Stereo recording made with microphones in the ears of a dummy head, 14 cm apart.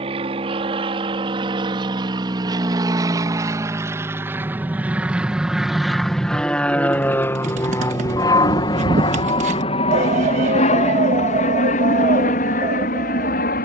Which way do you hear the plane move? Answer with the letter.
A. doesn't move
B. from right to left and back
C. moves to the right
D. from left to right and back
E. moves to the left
E.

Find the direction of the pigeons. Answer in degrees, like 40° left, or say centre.
50° right.